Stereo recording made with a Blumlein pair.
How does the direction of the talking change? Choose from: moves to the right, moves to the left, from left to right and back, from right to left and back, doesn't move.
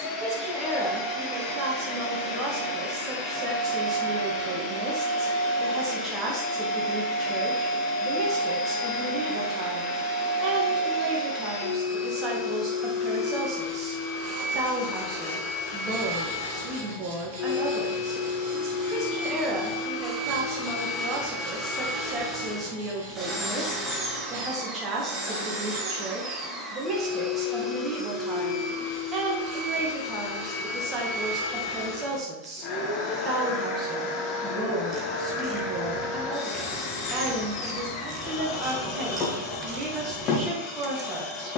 doesn't move.